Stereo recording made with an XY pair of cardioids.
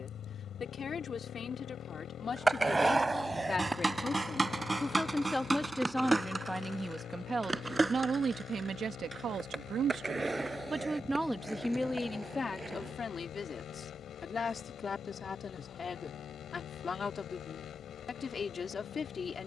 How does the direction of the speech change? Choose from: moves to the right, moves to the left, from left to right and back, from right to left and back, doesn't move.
from left to right and back.